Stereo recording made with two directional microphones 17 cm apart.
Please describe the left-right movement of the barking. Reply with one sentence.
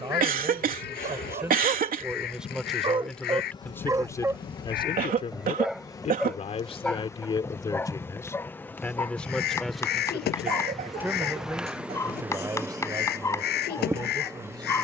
In this clip you hear the barking move to the left.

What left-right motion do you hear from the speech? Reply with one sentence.
In this clip you hear the speech move from right to left and back again.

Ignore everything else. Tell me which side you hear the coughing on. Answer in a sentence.
You can hear the coughing on the right.